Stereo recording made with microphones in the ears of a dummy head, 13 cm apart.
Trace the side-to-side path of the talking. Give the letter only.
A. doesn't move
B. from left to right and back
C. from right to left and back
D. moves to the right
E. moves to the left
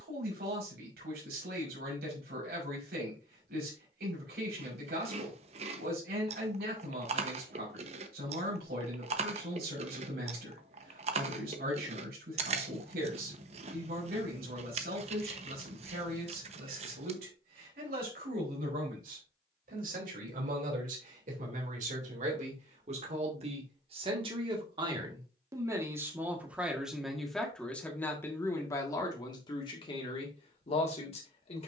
E.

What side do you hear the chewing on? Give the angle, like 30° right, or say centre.
40° right.